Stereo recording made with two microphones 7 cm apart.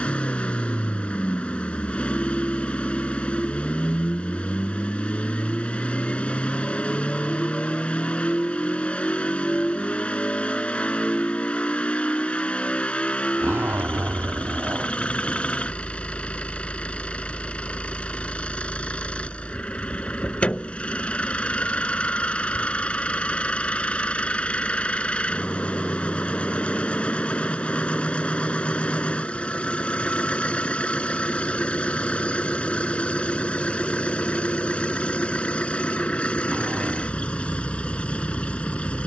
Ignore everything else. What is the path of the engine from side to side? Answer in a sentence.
You can hear the engine stay put.